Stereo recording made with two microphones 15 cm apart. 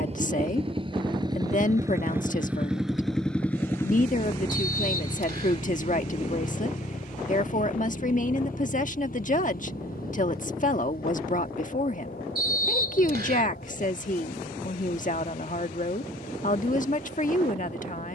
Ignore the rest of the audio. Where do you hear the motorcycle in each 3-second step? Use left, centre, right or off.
right, left, left, left, left, left.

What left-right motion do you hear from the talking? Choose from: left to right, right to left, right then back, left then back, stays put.
stays put.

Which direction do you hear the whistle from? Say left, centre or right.
right.